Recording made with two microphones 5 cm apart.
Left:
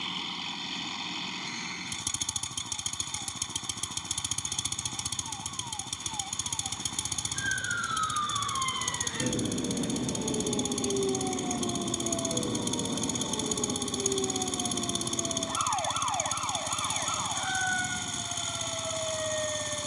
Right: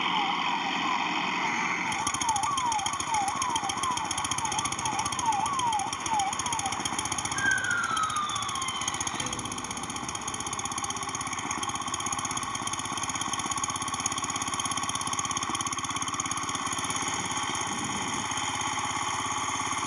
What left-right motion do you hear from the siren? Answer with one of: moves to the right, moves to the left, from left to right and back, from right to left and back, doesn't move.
moves to the left.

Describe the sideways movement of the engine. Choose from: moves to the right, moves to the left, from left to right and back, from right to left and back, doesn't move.
doesn't move.